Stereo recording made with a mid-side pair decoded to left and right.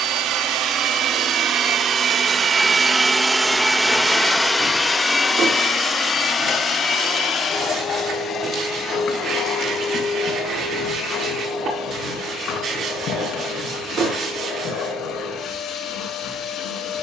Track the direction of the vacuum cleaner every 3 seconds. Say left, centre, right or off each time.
right, centre, left, left, left, left.